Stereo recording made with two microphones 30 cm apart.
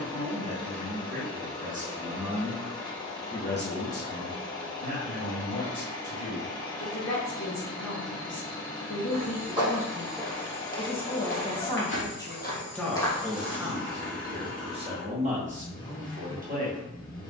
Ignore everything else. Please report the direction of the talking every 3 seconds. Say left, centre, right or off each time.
right, left, left, left, centre, right.